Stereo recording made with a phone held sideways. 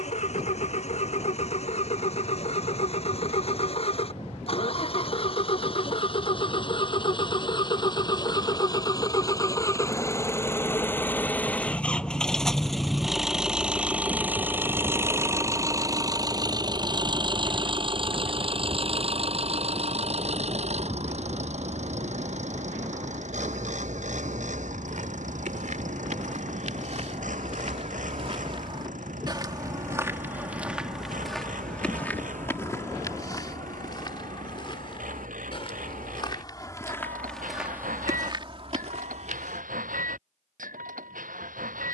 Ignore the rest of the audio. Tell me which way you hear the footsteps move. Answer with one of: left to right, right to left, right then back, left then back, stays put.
left then back.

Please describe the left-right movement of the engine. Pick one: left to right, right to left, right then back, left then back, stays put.
left to right.